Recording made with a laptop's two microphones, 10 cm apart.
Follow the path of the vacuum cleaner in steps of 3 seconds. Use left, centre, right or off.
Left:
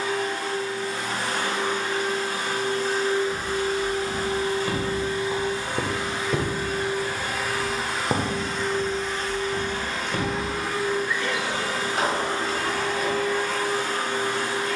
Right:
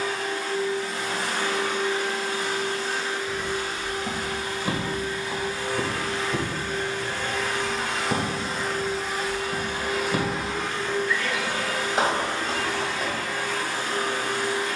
left, left, centre, centre, left.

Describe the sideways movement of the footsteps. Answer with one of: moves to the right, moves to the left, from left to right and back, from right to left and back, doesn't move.
from right to left and back.